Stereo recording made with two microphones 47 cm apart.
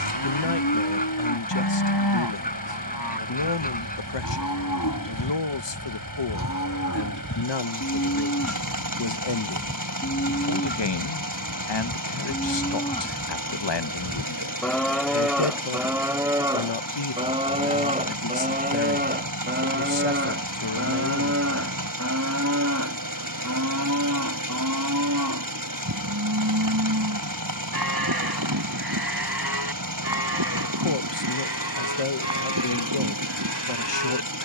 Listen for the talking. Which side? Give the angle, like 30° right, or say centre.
60° left.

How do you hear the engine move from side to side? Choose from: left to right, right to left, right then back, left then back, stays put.
stays put.